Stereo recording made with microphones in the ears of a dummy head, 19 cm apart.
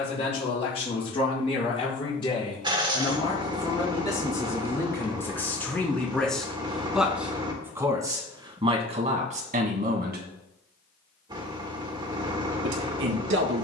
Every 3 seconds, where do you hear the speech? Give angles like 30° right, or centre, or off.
30° left, 20° left, 10° right, 40° right, 70° right.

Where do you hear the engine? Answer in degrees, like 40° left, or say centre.
20° right.